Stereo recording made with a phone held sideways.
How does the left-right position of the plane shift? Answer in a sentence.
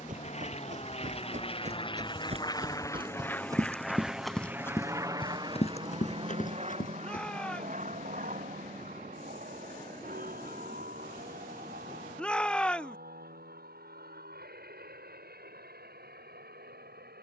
In this clip you hear the plane go from the left side to the right.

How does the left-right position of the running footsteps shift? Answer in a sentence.
You can hear the running footsteps move from right to left.